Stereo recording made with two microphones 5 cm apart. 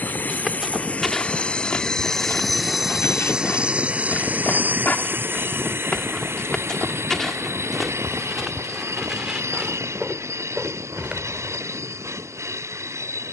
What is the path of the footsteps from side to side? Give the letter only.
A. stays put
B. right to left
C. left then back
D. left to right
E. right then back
C.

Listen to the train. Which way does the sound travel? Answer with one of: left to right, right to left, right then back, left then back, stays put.
left to right.